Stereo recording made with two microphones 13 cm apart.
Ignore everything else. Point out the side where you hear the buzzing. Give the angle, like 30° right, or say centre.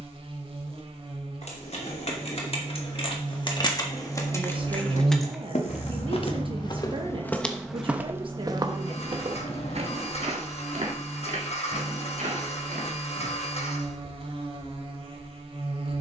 50° right.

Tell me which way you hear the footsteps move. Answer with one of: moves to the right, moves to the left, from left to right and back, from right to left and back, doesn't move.
moves to the right.